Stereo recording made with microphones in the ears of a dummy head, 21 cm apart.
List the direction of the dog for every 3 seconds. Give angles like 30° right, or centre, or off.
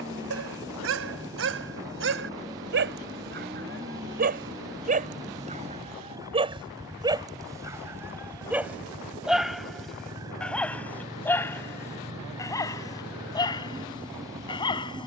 60° right, 40° right, 20° right, centre, 20° left.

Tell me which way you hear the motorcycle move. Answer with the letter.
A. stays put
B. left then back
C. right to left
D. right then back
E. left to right
A.